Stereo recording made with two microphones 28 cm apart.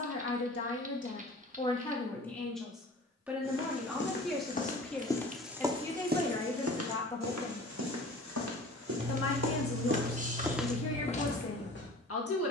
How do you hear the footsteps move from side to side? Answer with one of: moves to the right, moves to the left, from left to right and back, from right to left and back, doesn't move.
from left to right and back.